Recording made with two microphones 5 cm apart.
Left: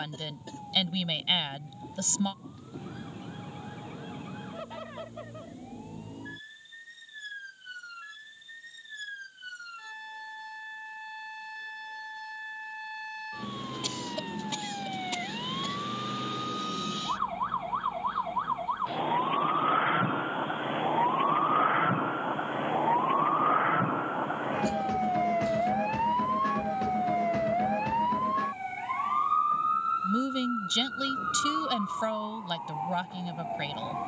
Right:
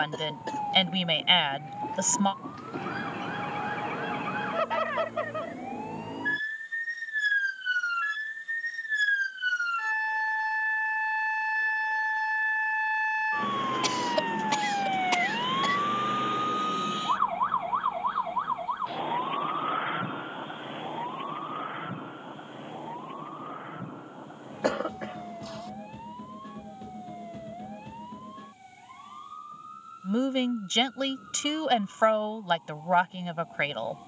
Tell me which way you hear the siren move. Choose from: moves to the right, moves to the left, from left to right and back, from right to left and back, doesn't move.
moves to the left.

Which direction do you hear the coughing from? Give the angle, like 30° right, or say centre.
70° right.